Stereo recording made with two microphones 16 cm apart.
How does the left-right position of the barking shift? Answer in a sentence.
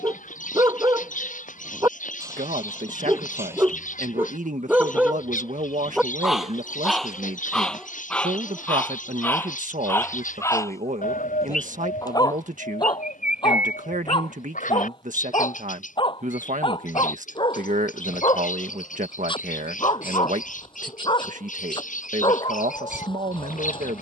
You can hear the barking move to the left.